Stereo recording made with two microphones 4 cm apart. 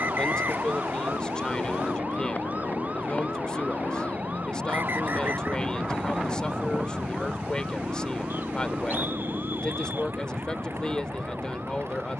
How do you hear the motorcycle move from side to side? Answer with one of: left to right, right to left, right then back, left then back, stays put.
left to right.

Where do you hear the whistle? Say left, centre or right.
right.